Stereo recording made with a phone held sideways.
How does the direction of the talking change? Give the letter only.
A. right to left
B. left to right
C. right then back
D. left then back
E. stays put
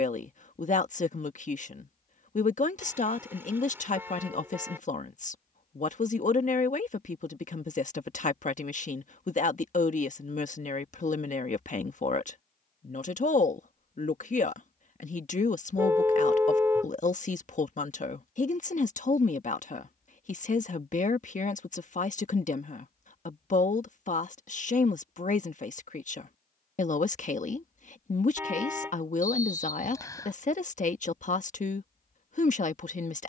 E.